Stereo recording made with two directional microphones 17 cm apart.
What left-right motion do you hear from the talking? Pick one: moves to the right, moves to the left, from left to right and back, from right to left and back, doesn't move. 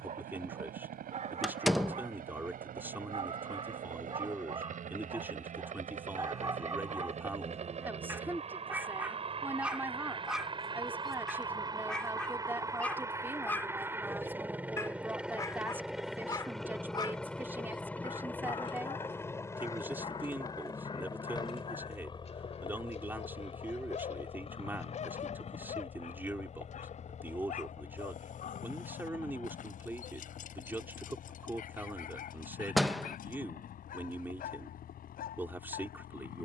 doesn't move.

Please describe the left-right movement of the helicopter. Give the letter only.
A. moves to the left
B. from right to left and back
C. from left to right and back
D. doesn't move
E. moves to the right
A.